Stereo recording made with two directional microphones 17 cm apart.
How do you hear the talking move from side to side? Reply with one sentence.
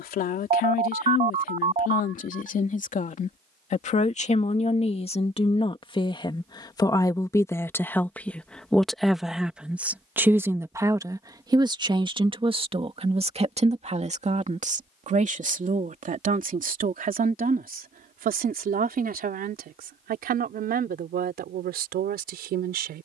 In this clip you hear the talking go from the left side to the right.